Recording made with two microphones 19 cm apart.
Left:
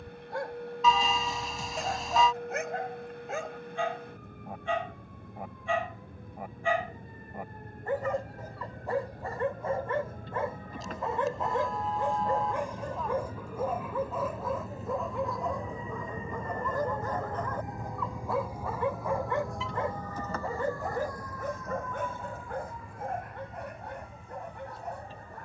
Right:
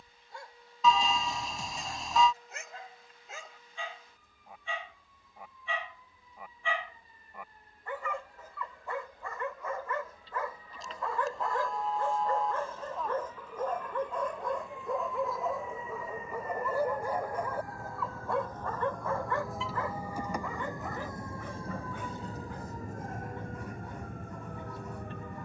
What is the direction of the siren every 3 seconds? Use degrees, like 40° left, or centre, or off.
70° left, 60° left, 60° left, 60° left, 50° left, 30° left, centre, 40° right, 60° right.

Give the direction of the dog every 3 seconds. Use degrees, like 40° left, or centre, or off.
70° left, 60° left, 40° left, 30° left, 10° left, 10° right, 20° left, 60° left, 70° left.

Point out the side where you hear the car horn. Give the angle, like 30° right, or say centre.
centre.